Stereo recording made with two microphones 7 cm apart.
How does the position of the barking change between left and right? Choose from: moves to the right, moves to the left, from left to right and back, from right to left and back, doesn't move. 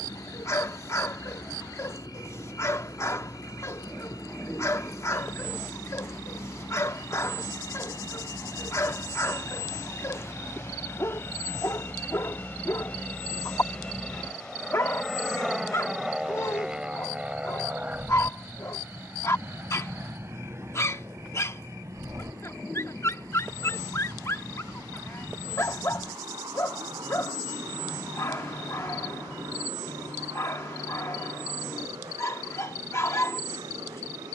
doesn't move.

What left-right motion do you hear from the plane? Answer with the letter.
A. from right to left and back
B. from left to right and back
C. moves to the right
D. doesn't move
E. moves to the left
C.